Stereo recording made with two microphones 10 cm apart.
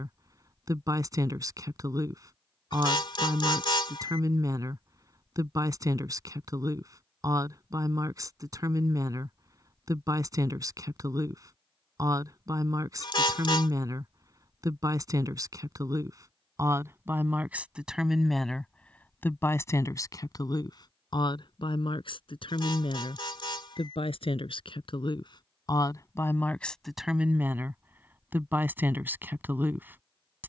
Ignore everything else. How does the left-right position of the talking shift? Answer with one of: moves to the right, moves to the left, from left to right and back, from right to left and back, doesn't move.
from right to left and back.